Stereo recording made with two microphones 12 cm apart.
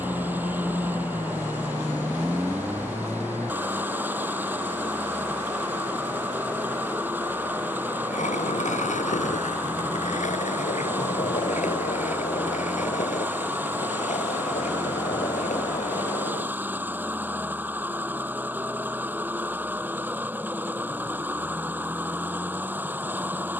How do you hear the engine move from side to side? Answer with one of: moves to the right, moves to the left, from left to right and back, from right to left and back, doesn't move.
doesn't move.